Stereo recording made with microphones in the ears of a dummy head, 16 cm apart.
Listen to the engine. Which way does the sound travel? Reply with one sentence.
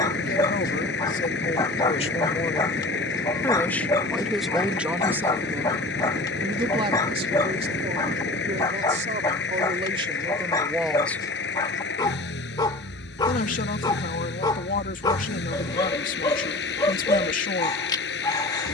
In this clip you hear the engine stay put.